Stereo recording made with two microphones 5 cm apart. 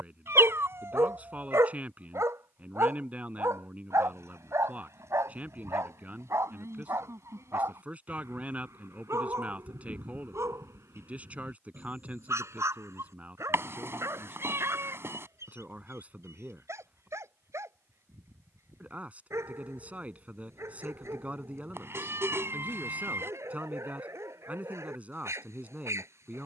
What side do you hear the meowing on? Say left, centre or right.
right.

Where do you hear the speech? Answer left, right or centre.
right.